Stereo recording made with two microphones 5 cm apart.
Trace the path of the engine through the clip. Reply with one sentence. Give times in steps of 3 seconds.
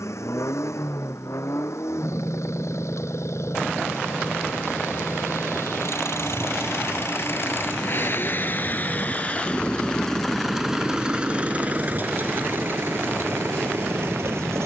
In this clip you hear the engine on the left from 0 s, in the centre from 9 s and on the right from 12 s.